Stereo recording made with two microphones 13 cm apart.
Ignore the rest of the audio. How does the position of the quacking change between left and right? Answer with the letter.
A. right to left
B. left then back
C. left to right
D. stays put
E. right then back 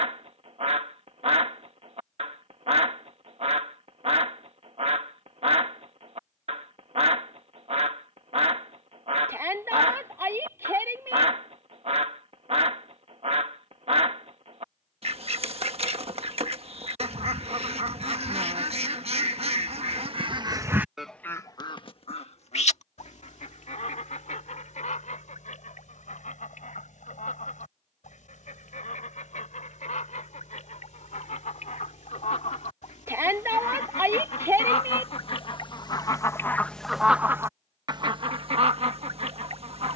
B.